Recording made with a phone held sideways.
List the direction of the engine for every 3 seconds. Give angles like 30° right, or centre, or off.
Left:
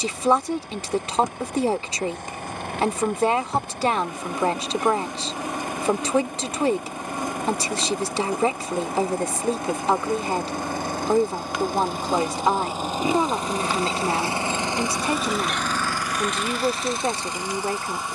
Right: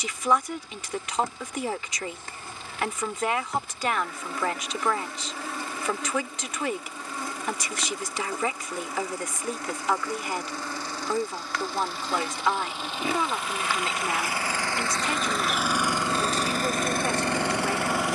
60° left, 60° left, 60° left, 50° left, 40° left, 40° right.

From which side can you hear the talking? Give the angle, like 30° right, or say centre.
30° left.